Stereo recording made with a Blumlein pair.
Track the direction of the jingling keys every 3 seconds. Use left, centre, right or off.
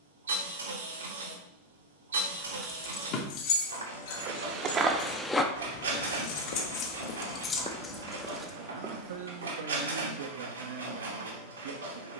centre, left, left, off.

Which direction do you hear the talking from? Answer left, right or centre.
right.